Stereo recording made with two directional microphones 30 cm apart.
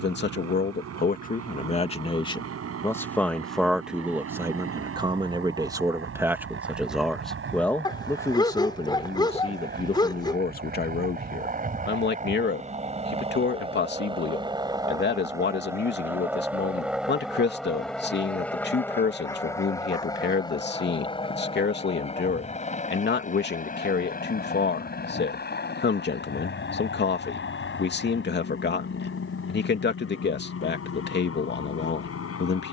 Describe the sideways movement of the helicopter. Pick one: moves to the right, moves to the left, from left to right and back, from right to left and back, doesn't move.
moves to the left.